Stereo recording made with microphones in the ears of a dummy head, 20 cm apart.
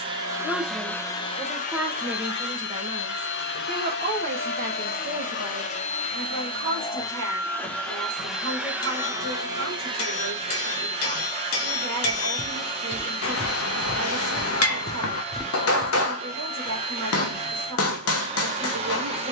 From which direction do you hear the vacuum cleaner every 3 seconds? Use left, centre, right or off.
left, left, centre, right, right, right, right.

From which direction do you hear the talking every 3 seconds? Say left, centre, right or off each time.
centre, right, right, right, right, right, right.